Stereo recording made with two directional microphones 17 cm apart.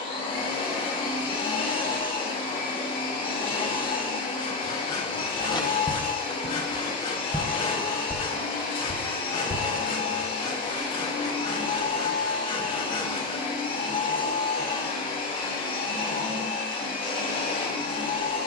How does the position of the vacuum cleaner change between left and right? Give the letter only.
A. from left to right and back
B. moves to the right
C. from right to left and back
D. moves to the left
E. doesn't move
E.